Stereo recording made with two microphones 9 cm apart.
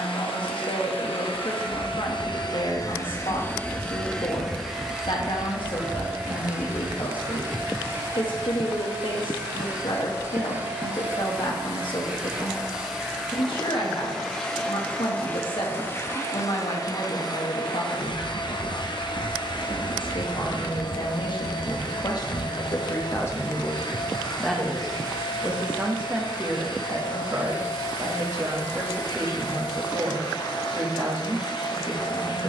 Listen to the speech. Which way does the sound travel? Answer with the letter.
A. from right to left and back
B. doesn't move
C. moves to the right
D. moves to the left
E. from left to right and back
C.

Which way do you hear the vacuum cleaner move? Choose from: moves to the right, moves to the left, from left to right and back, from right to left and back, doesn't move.
from left to right and back.